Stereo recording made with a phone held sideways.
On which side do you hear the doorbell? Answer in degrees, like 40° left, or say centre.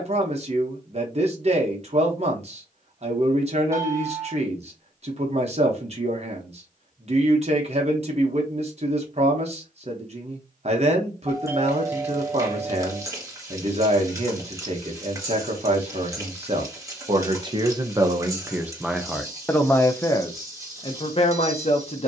20° right.